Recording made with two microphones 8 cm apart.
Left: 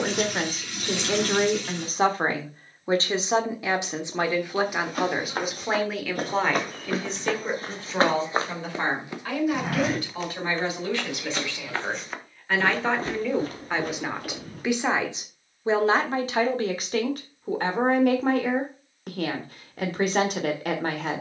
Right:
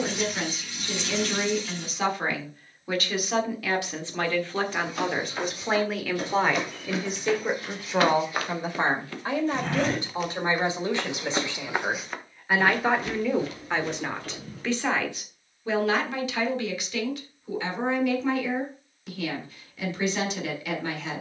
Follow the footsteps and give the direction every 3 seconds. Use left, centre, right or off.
off, left, left, centre, left, off, off.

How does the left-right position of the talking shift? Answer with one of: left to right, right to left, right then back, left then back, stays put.
right then back.